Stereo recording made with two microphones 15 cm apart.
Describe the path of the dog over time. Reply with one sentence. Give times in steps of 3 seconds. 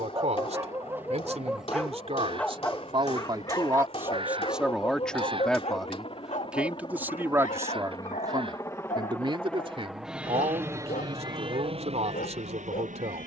You can hear the dog in the centre from 0 s and on the left from 3 s.